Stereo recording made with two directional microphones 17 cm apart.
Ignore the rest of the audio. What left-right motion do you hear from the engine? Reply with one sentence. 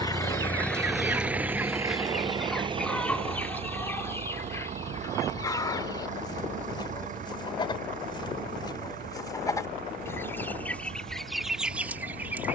In this clip you hear the engine move to the right.